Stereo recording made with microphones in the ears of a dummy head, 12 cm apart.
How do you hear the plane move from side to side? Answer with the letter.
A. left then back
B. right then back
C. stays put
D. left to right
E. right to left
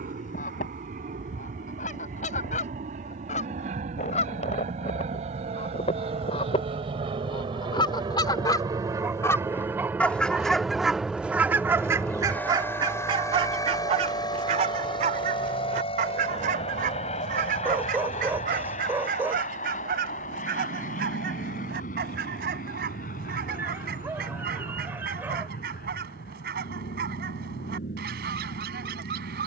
E.